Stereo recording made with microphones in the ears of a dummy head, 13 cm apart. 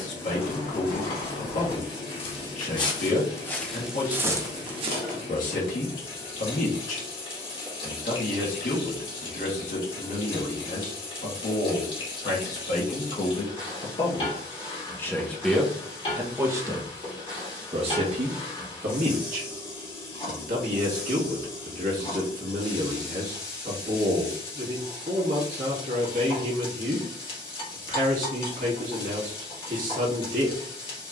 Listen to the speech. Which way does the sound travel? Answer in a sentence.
You can hear the speech move from left to right.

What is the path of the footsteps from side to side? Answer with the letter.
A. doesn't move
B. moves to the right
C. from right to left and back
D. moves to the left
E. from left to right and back
B.